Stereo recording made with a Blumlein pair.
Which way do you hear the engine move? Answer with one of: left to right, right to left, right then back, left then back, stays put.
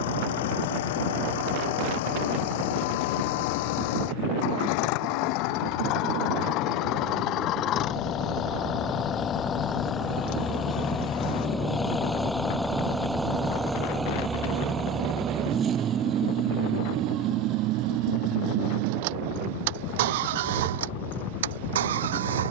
left to right.